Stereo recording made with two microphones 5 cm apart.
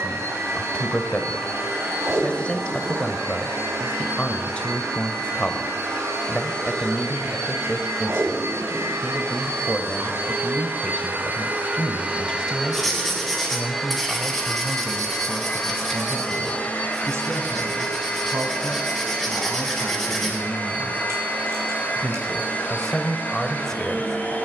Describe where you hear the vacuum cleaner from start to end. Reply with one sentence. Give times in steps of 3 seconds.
You can hear the vacuum cleaner on the right from 0 s, in the centre from 12 s and on the left from 15 s.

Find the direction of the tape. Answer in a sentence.
You can hear the tape on the right.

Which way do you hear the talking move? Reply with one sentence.
You can hear the talking go right and come back.